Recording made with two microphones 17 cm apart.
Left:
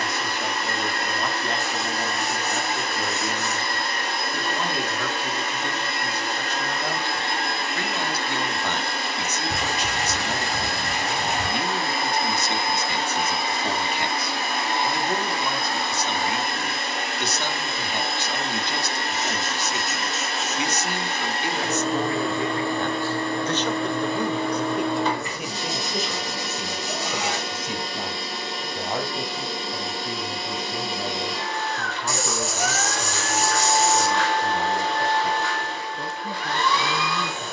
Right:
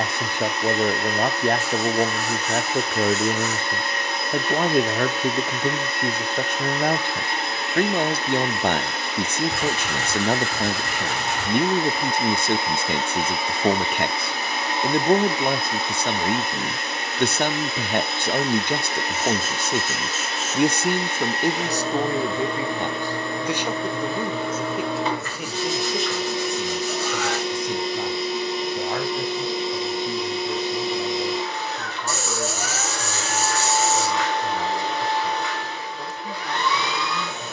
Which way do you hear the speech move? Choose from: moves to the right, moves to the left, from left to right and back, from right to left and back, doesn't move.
moves to the left.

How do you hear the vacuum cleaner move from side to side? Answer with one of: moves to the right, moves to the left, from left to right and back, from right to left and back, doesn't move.
doesn't move.